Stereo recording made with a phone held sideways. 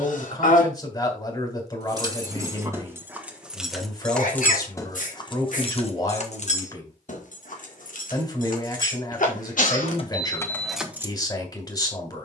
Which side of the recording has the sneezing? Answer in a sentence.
You can hear the sneezing on the left.